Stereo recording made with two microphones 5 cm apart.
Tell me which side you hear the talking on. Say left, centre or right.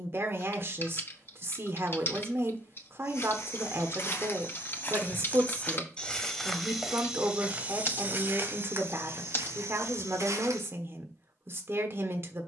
right.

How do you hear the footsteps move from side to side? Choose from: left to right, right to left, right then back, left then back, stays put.
left to right.